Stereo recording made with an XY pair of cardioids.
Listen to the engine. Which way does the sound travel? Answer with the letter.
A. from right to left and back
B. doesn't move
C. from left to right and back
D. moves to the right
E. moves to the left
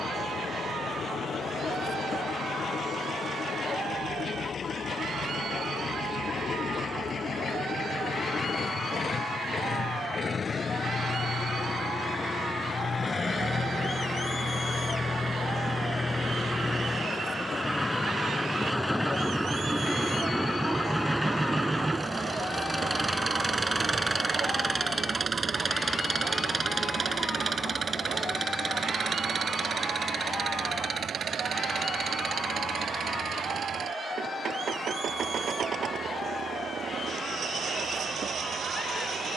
D.